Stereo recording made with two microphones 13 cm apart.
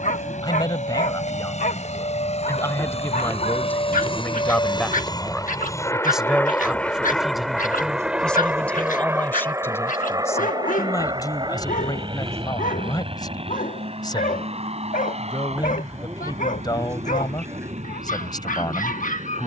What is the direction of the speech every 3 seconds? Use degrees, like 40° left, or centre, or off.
30° left, 10° left, centre, 20° left, 30° left, 30° left, 30° left.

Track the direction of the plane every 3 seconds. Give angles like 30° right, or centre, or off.
60° left, 40° left, centre, 30° right, 40° right, 50° right, 50° right.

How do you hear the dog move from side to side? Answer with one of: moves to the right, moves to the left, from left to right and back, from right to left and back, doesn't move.
doesn't move.